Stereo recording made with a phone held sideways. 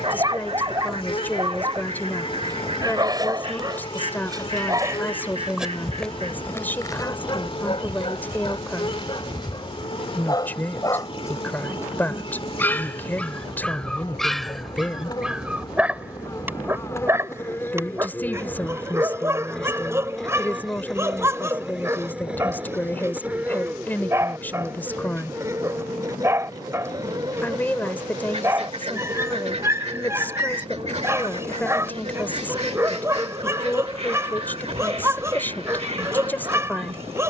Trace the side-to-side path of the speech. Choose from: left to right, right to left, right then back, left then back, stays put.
stays put.